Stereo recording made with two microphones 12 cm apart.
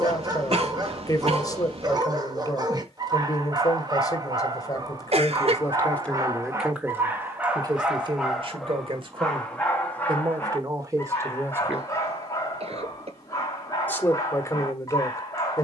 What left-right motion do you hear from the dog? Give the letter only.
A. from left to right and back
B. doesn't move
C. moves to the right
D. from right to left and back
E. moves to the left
E.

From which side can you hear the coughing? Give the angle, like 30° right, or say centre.
60° right.